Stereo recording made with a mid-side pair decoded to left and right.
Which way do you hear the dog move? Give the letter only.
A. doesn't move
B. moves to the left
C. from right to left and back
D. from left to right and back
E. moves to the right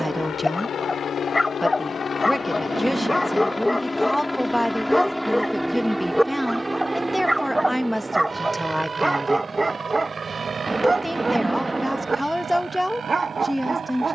E.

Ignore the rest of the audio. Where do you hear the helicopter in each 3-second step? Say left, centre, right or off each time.
left, centre, right, right, right.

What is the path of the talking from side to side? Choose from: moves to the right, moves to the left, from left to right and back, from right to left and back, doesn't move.
doesn't move.